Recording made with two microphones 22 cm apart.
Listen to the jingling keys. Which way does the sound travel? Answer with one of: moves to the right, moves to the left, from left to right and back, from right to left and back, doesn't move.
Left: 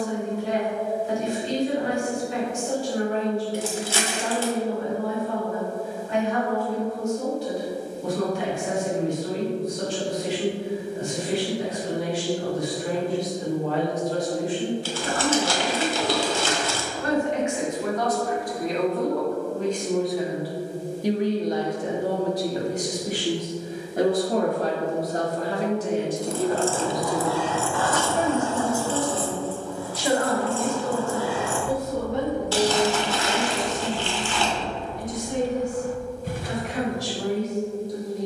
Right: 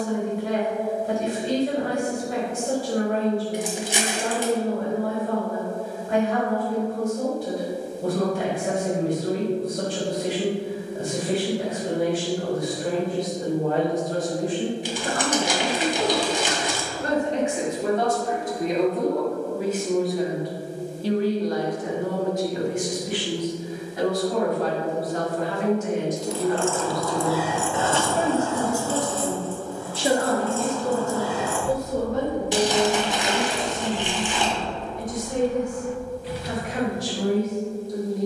from left to right and back.